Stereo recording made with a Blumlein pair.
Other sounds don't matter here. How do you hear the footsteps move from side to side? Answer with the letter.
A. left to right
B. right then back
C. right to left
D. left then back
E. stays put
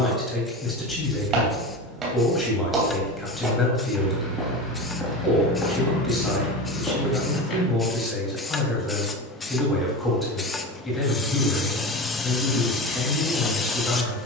C.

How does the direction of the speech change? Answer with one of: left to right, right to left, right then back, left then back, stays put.
stays put.